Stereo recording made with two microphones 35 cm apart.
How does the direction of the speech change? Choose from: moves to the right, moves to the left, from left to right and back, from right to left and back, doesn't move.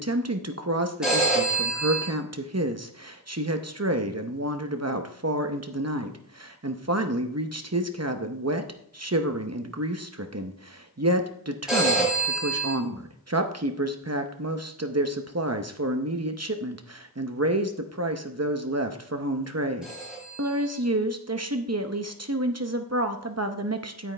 doesn't move.